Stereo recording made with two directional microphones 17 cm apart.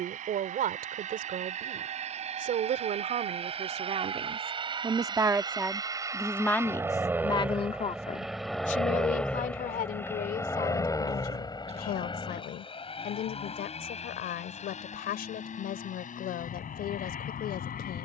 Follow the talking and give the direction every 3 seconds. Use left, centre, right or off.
right, right, left, left, left, left.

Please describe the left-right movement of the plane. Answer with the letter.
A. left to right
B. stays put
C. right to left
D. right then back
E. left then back
C.